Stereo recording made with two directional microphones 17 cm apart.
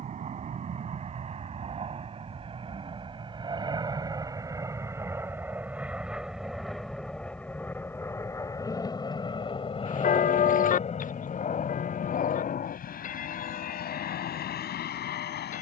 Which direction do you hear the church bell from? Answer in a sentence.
In this clip you hear the church bell on the left.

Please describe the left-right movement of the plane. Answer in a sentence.
You can hear the plane go from the right side to the left.